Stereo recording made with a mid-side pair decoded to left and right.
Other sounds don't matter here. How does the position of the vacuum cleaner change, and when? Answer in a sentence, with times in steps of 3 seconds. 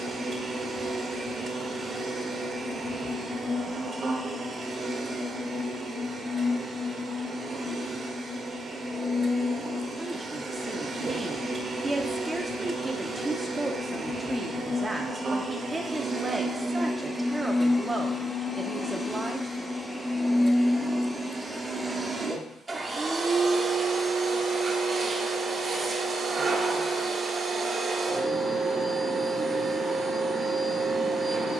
In this clip you hear the vacuum cleaner on the right from 0 s, in the centre from 18 s and on the right from 21 s.